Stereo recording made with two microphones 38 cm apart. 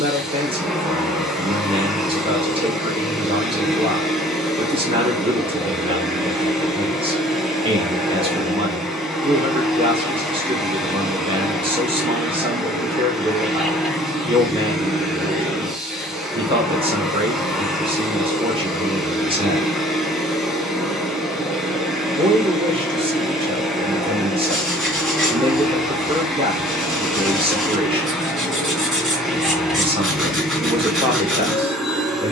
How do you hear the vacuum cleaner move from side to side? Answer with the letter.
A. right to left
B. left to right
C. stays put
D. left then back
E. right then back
C.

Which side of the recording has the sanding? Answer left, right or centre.
centre.